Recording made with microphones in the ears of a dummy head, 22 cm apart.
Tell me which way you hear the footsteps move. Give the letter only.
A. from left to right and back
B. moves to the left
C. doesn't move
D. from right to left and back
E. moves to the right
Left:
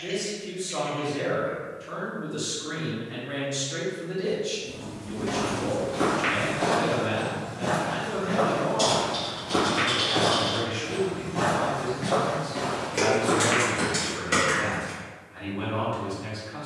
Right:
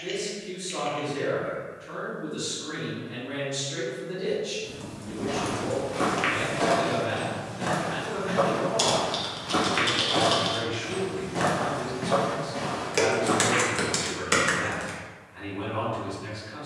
A.